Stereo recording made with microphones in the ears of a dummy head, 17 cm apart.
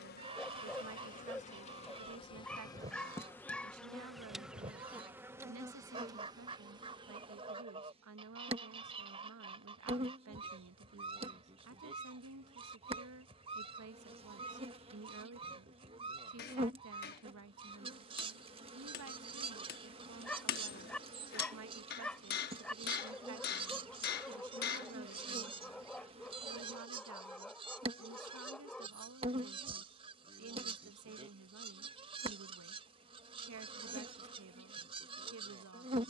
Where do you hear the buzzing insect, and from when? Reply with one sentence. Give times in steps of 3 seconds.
In this clip you hear the buzzing insect on the left from 0 s, in the centre from 3 s and on the right from 6 s.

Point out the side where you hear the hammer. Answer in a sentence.
In this clip you hear the hammer on the left.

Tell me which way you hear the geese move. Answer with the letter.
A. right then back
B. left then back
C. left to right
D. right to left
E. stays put
E.